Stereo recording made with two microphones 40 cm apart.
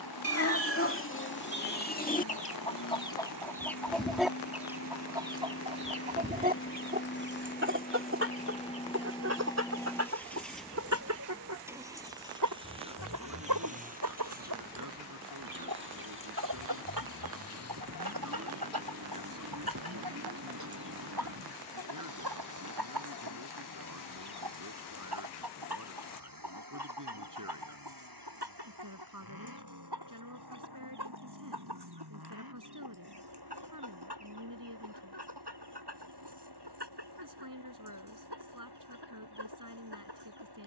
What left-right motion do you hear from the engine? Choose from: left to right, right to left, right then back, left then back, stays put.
left to right.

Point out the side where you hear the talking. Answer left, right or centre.
right.